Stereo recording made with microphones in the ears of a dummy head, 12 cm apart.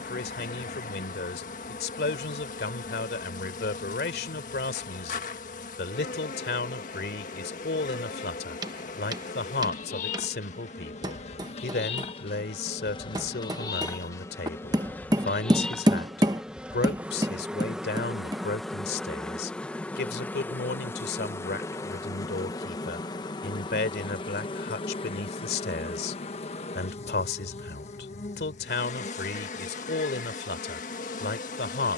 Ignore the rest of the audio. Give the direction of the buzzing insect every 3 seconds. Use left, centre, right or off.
left, left, left, left, left, centre, centre, left, left, left, left.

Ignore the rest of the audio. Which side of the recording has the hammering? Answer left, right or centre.
right.